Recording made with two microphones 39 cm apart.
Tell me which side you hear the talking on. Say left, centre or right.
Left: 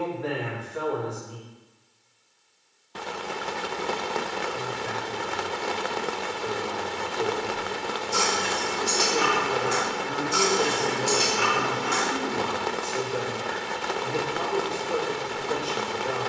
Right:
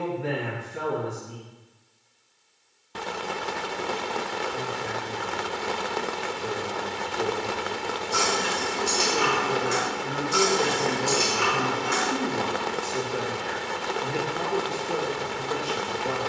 right.